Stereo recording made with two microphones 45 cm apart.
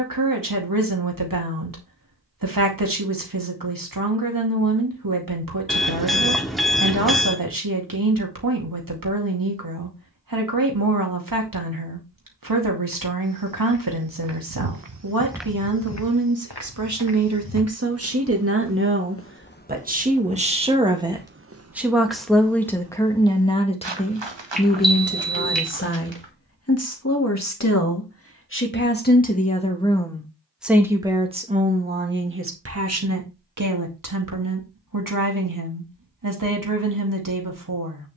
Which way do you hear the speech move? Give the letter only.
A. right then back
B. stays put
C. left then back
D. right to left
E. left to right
C.